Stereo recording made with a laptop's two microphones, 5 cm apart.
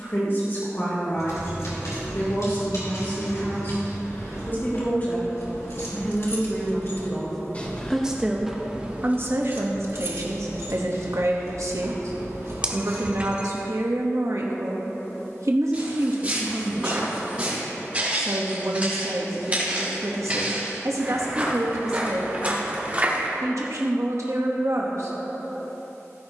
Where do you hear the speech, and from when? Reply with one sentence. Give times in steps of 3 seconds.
You can hear the speech on the left from 0 s, in the centre from 6 s and on the right from 9 s.